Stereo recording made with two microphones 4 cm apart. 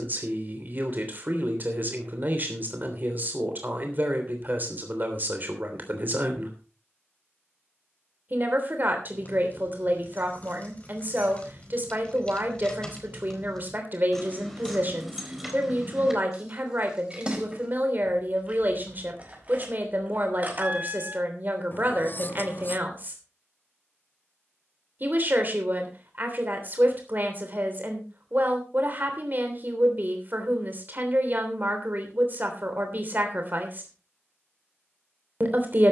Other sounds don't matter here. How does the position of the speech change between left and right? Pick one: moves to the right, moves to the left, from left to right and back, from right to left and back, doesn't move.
doesn't move.